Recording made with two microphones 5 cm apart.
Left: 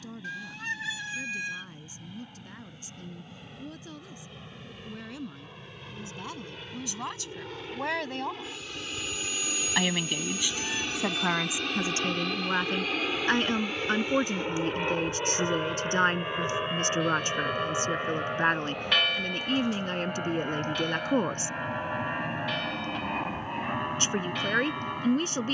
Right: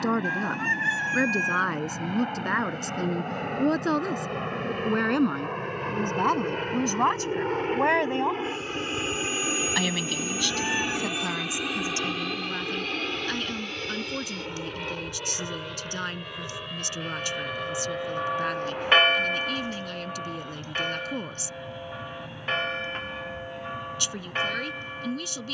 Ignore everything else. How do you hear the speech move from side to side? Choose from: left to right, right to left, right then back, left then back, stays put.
right to left.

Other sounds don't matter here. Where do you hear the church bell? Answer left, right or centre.
right.